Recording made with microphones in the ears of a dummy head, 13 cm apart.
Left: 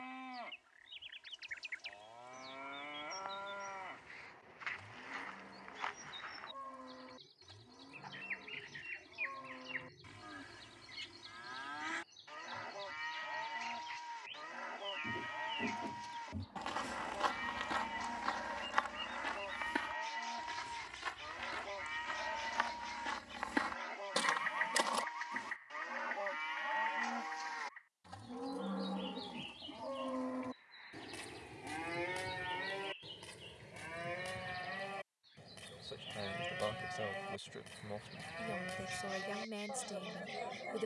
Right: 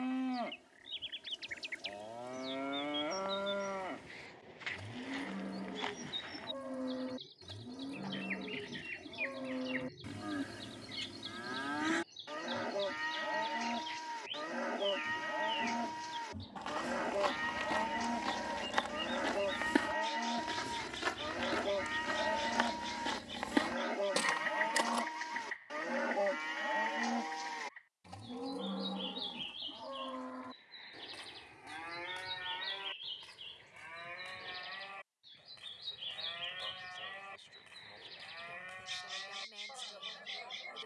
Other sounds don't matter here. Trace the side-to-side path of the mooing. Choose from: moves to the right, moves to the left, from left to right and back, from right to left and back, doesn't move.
moves to the left.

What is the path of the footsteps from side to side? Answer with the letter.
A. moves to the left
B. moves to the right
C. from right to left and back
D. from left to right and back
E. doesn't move
D.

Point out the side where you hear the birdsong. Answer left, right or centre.
right.